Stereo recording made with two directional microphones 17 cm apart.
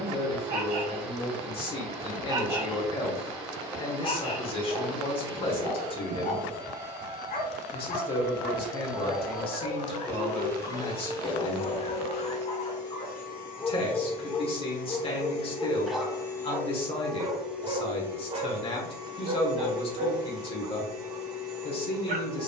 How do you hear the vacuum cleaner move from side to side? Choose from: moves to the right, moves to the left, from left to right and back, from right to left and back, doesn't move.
from right to left and back.